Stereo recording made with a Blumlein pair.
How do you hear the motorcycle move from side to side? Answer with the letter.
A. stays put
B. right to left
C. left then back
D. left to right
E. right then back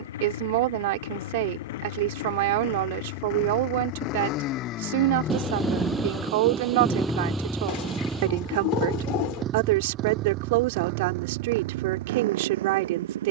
D.